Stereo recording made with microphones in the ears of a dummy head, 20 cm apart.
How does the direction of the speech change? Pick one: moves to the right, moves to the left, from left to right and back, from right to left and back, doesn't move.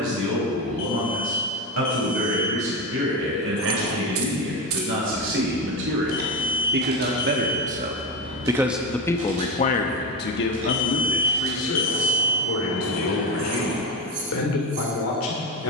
moves to the left.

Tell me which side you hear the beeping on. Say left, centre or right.
left.